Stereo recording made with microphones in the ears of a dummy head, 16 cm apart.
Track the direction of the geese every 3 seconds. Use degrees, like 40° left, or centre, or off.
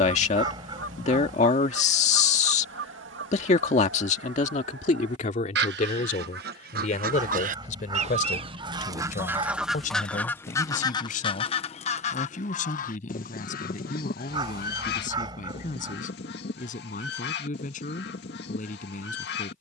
80° right, 70° right, 40° right, 10° left, 50° left, 60° left, 60° left.